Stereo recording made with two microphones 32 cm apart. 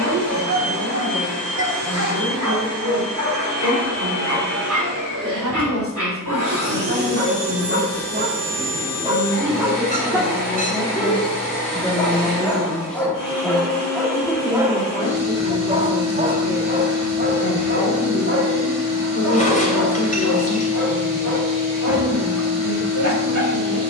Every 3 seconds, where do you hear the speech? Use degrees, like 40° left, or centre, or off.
60° right, 50° right, 40° right, 20° right, 10° left, 20° left, 40° left, 50° left.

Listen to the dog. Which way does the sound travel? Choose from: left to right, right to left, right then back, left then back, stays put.
left then back.